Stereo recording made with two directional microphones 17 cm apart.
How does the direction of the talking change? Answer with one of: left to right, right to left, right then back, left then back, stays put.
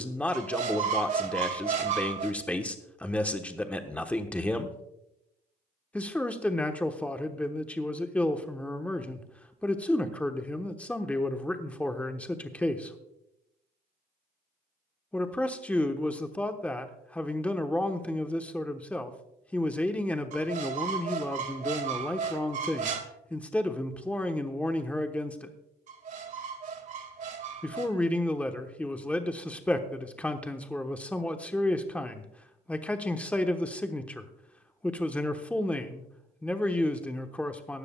stays put.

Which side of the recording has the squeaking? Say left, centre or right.
right.